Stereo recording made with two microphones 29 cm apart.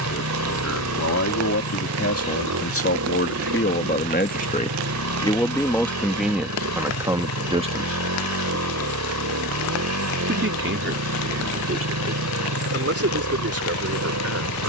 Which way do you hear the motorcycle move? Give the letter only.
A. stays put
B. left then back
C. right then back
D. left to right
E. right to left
A.